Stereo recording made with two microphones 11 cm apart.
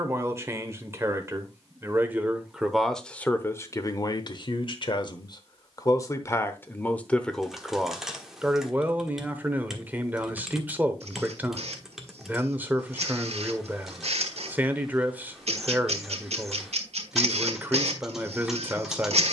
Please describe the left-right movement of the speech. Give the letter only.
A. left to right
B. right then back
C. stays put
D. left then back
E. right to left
D.